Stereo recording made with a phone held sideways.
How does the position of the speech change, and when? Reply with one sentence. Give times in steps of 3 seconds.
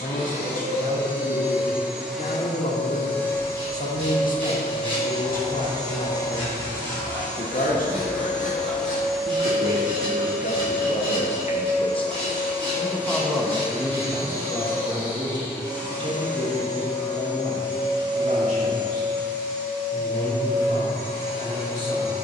In this clip you hear the speech on the left from 0 s, in the centre from 12 s and on the right from 15 s.